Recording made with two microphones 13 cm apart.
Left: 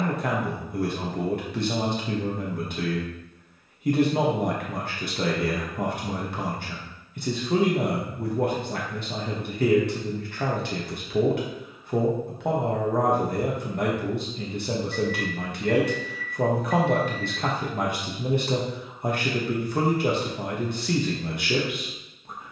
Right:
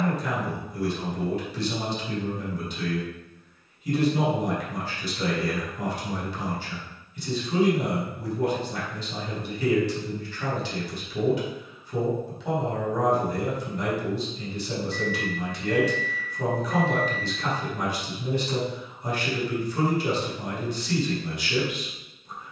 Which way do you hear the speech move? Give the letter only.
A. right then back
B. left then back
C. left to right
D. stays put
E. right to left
D.